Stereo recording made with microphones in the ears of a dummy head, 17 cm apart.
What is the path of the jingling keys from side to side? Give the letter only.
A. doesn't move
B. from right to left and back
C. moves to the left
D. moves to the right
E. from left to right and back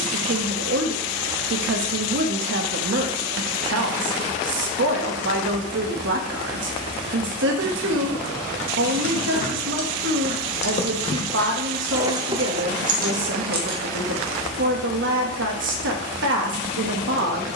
D.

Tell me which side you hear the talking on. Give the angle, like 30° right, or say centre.
70° right.